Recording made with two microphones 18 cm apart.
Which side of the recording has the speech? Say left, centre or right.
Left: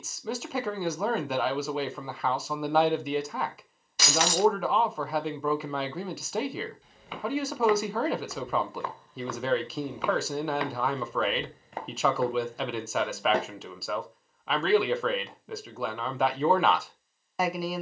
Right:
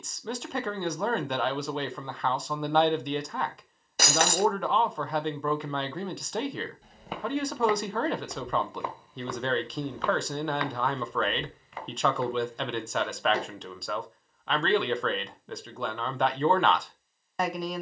centre.